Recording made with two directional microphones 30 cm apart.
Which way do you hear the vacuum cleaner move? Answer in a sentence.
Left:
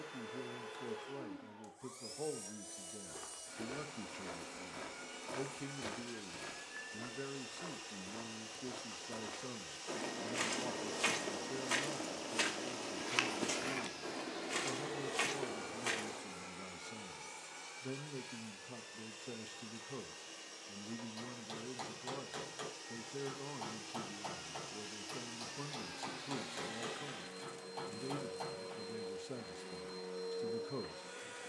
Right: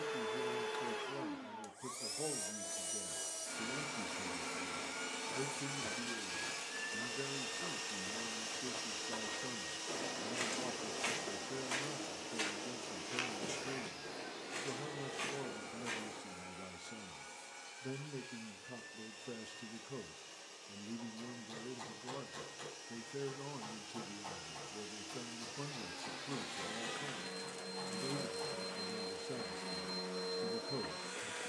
You can hear the vacuum cleaner go left and come back.